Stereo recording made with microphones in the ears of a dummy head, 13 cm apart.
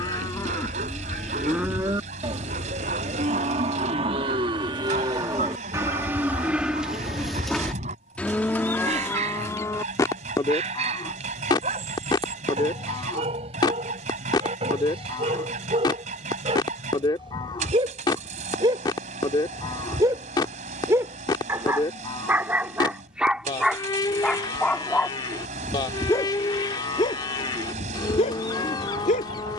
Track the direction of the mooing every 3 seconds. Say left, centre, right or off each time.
centre, right, centre, left, left, left, left, left, left, left.